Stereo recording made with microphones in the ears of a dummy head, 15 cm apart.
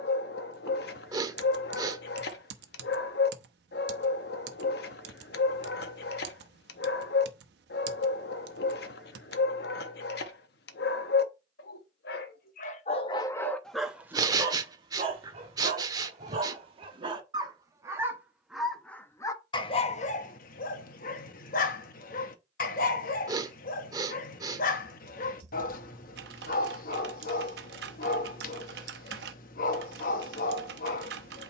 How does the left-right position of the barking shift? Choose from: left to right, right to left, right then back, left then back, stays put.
right then back.